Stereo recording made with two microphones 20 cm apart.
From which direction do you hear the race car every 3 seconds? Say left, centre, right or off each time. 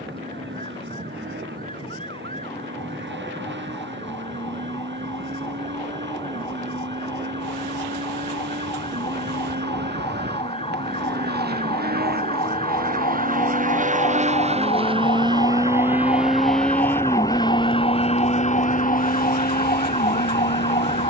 right, right, right, right, right, centre, left.